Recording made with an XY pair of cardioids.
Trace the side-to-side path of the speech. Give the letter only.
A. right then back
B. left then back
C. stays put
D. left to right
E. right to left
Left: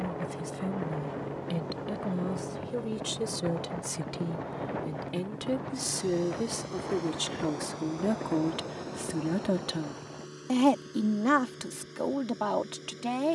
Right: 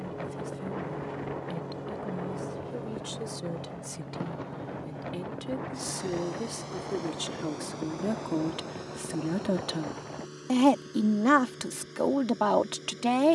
D.